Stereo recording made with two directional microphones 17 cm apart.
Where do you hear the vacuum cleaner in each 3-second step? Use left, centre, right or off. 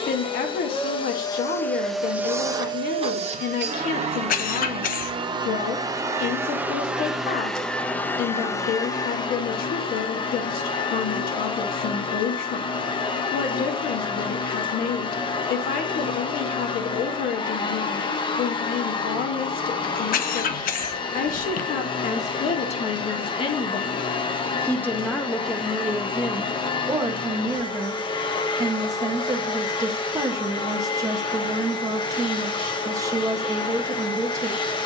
centre, right, centre, left, left, left, left, left, left, left, left, left.